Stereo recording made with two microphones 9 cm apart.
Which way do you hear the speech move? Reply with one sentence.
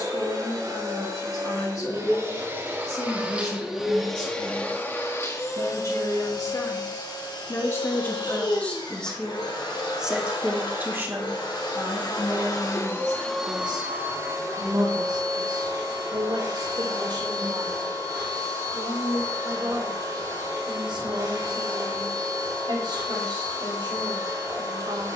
You can hear the speech move from left to right.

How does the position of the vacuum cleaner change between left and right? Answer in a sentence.
In this clip you hear the vacuum cleaner go left and come back.